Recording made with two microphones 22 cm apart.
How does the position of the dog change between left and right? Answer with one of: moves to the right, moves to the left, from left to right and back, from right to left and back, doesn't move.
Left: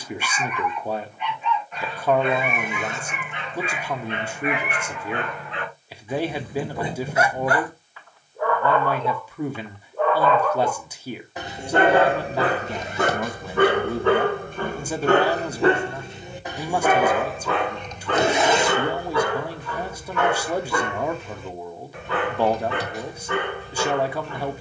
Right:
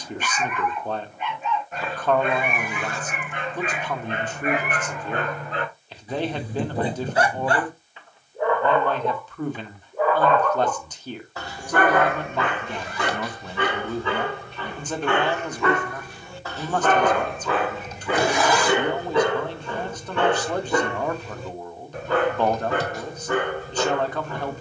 from right to left and back.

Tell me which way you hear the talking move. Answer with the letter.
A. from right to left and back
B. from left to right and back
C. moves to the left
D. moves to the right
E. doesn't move
E.